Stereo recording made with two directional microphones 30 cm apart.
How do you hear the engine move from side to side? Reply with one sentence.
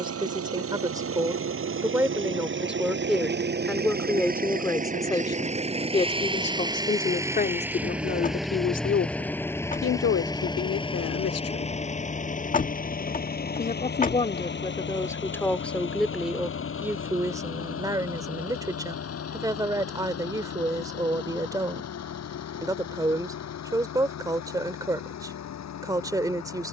You can hear the engine travel towards the left.